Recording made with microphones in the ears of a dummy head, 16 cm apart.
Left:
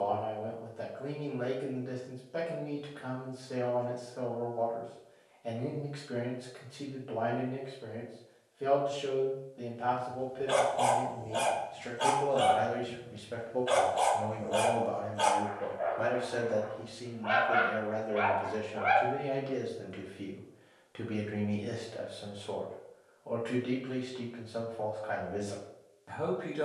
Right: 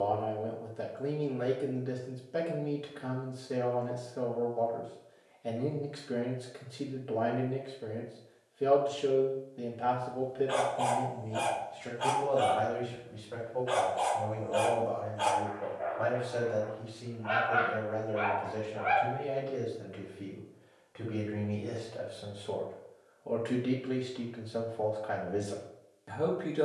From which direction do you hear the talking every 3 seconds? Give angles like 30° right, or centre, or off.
20° right, 20° right, 20° right, 10° right, 30° left, 50° left, 60° left, centre, 20° right.